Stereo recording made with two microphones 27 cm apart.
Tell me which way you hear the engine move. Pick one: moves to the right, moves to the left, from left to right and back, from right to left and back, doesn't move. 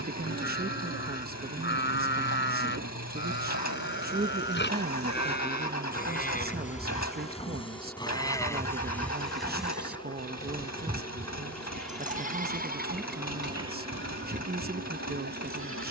doesn't move.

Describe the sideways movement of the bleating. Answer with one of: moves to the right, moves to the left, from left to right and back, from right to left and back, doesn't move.
moves to the right.